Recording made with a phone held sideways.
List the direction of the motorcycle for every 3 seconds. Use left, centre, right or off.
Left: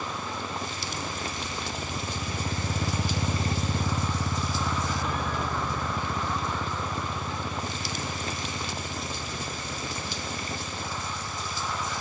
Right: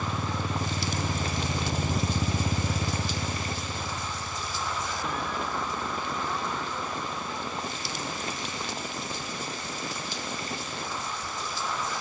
right, left, left, left.